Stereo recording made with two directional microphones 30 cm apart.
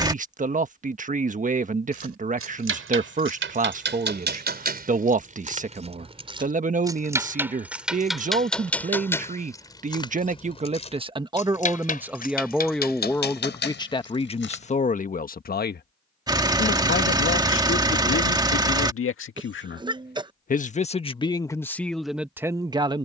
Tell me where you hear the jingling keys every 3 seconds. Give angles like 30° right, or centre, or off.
40° right, 30° right, 10° right, 20° left, 30° left, off, off, off.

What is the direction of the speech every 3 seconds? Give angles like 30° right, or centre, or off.
20° right, 20° right, 20° right, 20° right, 10° left, 40° left, 40° left, centre.